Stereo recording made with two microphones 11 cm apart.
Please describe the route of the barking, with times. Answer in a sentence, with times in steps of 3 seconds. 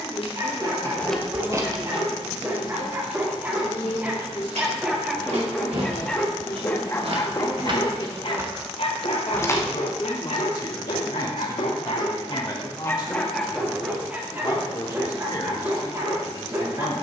You can hear the barking on the right from 0 s, in the centre from 3 s, on the left from 6 s, in the centre from 12 s and on the right from 15 s.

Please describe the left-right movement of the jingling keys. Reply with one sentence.
You can hear the jingling keys move from left to right and back again.